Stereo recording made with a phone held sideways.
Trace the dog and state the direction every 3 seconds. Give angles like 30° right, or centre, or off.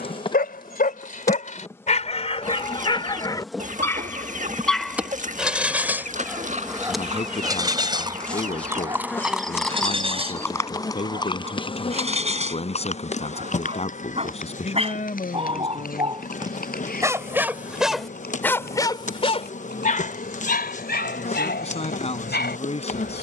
50° left, 10° left, 20° right, 40° right, 40° right, 20° right, 40° left, 80° left.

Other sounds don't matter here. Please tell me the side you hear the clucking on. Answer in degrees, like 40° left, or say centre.
50° right.